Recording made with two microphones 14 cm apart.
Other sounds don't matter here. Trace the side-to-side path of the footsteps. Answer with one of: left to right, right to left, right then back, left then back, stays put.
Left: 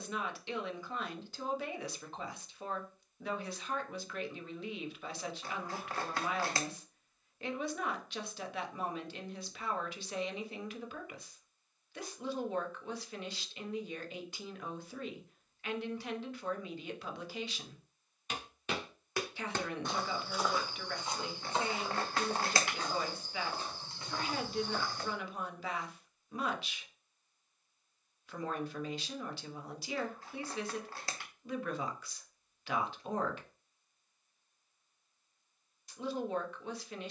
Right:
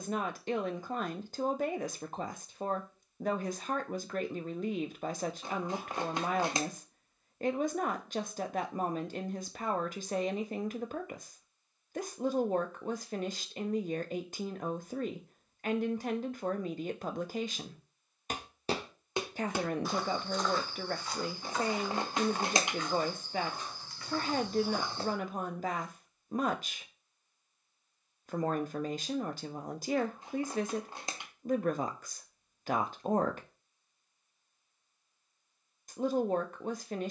left then back.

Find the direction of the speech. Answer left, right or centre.
right.